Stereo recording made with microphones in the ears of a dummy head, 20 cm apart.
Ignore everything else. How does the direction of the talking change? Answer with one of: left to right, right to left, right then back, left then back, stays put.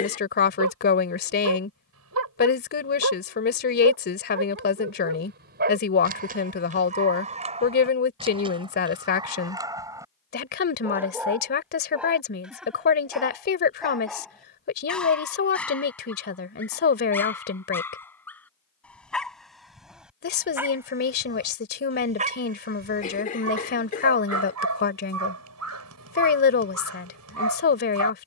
stays put.